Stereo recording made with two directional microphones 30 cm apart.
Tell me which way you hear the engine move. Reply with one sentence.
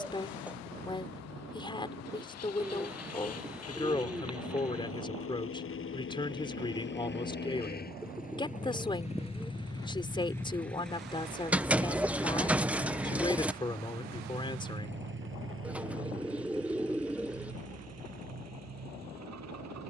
You can hear the engine move from left to right.